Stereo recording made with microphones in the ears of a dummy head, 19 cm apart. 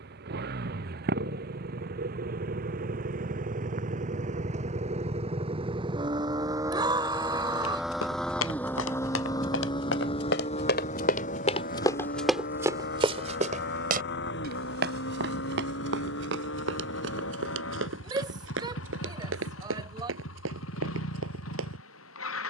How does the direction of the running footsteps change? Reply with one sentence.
In this clip you hear the running footsteps go from the left side to the right.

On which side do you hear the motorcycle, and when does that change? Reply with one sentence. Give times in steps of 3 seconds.
You can hear the motorcycle on the right from 0 s, in the centre from 6 s and on the left from 9 s.